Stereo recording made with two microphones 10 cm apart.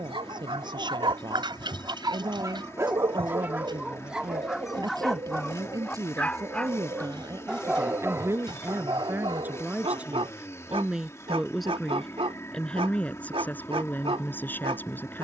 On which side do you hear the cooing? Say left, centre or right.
right.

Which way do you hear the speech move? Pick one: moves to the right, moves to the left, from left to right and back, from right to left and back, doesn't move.
moves to the left.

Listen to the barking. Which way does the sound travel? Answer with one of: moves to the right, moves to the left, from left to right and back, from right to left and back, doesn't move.
from right to left and back.